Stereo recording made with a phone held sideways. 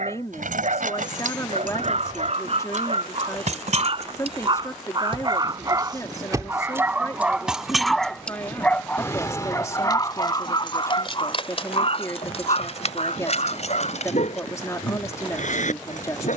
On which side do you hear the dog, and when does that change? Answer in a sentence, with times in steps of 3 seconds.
You can hear the dog on the right from 0 s, in the centre from 6 s and on the left from 9 s.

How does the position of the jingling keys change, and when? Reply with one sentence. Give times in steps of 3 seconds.
You can hear the jingling keys on the right from 0 s, in the centre from 6 s, on the left from 9 s and not at all from 15 s.